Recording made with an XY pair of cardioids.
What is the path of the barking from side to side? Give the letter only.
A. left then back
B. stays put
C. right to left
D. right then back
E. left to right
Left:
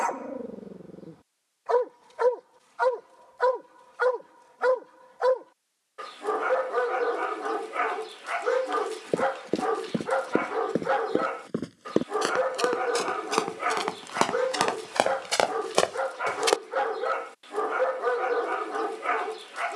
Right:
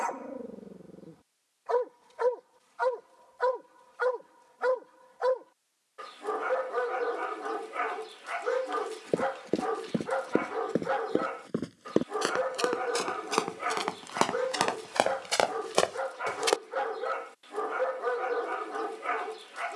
B.